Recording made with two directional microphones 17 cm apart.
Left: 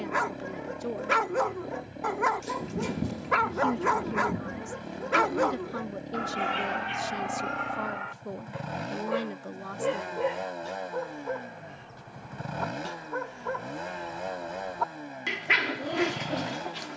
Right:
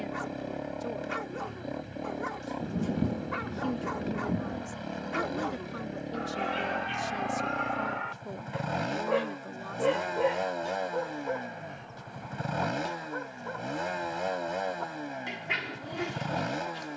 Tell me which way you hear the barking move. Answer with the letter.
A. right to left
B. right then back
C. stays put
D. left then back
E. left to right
B.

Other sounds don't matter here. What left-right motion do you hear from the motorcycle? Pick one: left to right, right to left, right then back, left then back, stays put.
stays put.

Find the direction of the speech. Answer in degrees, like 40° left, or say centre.
20° left.